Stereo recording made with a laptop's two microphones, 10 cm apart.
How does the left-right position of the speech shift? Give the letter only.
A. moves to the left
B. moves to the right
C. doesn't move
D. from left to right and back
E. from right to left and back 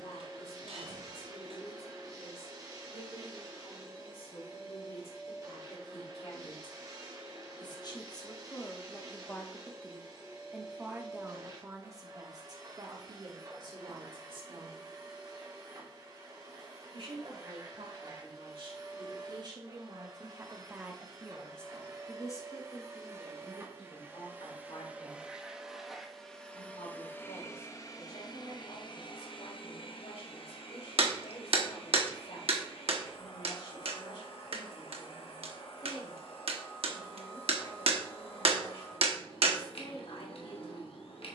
D.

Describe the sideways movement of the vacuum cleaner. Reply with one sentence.
You can hear the vacuum cleaner move to the left.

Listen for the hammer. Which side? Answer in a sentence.
You can hear the hammer on the right.